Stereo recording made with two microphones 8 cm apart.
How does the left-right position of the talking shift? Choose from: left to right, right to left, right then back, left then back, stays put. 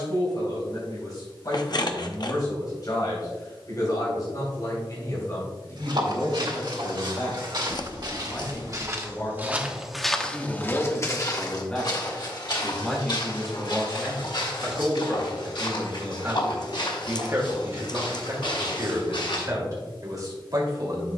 left to right.